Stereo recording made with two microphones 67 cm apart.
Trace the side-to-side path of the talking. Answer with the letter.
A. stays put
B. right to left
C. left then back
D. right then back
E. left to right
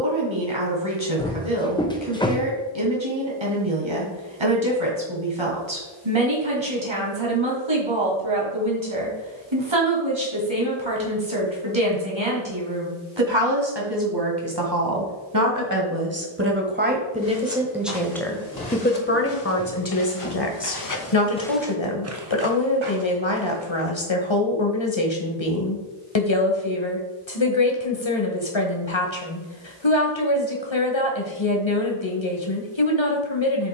B.